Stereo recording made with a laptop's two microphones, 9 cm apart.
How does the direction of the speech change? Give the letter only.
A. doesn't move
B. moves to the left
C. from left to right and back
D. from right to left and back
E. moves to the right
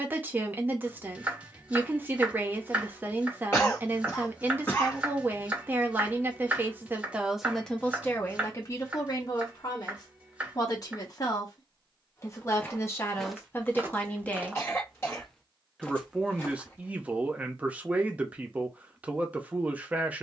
D.